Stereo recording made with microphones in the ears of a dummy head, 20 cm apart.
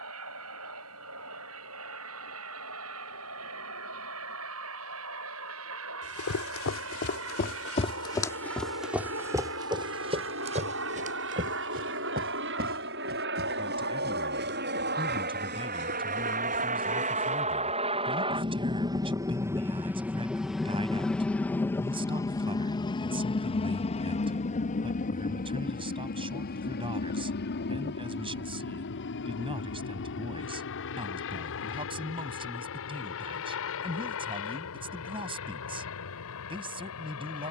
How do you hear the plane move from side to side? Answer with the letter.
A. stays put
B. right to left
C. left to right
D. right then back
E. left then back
B.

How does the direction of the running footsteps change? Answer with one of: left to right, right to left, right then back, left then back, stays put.
left to right.